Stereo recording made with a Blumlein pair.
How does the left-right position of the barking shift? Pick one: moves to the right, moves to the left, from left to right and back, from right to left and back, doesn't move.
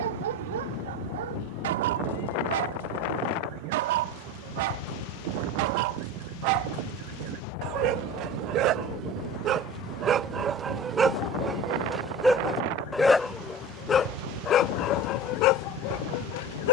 moves to the left.